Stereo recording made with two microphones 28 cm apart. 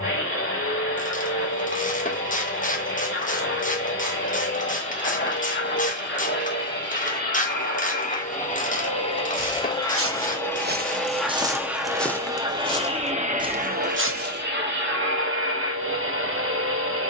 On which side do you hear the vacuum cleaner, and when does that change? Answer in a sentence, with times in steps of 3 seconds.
You can hear the vacuum cleaner on the left from 0 s, in the centre from 9 s and on the right from 12 s.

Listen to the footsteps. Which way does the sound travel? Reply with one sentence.
In this clip you hear the footsteps move from right to left and back again.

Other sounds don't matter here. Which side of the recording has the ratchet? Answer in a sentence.
You can hear the ratchet on the left.